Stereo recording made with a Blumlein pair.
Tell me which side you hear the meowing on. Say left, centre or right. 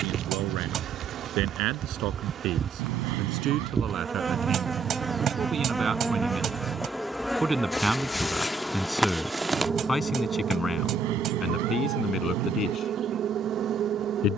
right.